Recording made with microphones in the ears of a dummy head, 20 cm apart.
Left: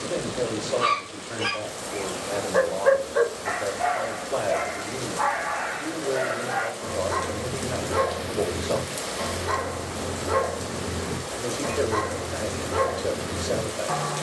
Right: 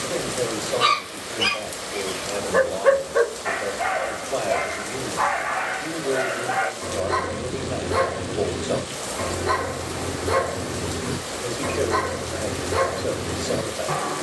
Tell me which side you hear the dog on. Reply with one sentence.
In this clip you hear the dog on the right.